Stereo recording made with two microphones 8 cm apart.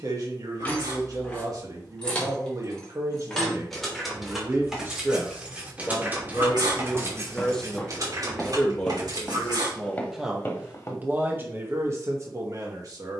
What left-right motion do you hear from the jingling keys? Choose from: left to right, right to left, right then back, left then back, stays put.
left to right.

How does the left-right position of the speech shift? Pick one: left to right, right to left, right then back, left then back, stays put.
left then back.